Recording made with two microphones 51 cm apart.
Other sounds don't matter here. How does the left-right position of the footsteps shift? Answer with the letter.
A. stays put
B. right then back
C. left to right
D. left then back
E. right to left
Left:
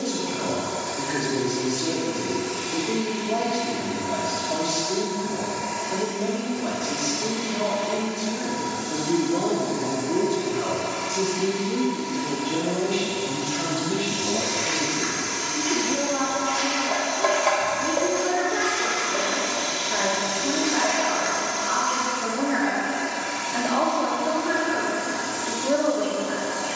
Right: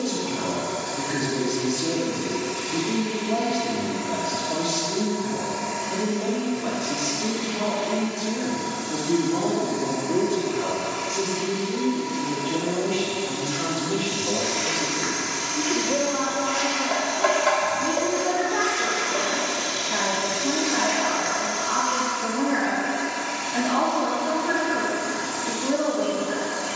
D.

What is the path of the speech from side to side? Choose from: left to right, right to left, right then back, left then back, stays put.
left then back.